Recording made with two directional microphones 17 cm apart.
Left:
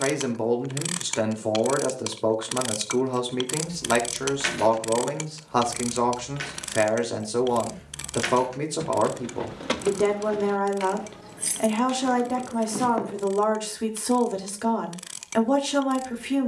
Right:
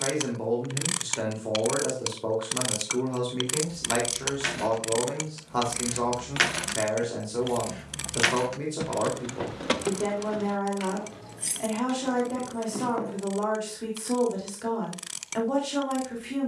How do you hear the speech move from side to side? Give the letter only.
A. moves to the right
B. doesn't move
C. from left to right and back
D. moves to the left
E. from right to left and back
B.